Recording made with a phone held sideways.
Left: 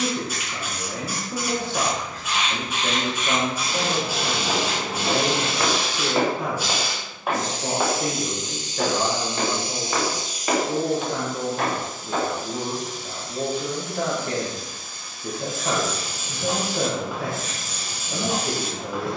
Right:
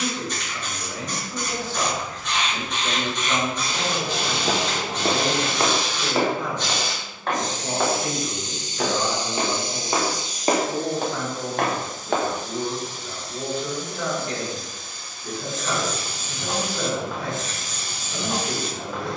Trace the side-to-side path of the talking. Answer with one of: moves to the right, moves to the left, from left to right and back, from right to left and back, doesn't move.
doesn't move.